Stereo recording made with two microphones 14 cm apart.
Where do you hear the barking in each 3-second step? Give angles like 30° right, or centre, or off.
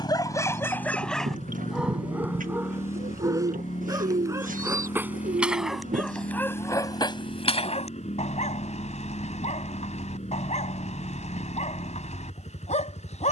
centre, 20° right, 40° left, 60° left, 60° left.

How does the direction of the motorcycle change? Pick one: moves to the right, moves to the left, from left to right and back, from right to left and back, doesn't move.
doesn't move.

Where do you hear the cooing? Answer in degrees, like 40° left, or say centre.
80° right.